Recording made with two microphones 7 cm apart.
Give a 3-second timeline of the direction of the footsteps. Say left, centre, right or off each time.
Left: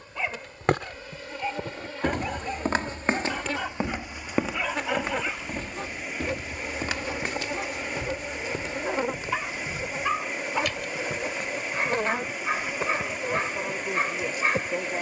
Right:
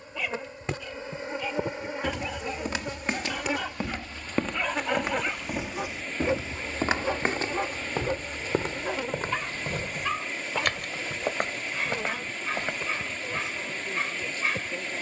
left, centre, right, right, right.